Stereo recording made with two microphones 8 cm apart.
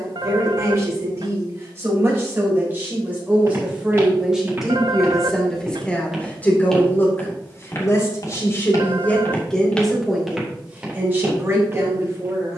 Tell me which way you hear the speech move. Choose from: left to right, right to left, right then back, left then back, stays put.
left then back.